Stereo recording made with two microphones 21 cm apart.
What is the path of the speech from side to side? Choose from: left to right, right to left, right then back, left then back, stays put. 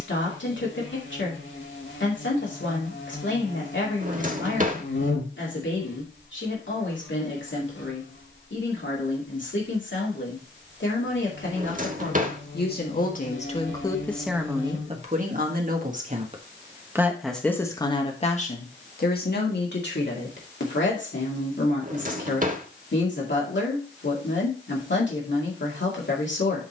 right then back.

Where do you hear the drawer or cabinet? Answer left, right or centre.
right.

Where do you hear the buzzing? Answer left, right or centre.
left.